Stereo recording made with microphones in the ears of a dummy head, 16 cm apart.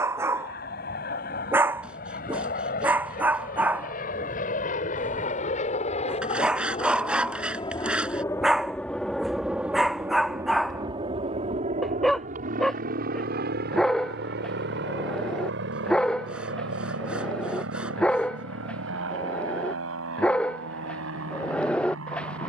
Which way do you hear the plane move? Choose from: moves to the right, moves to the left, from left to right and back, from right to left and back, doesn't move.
moves to the right.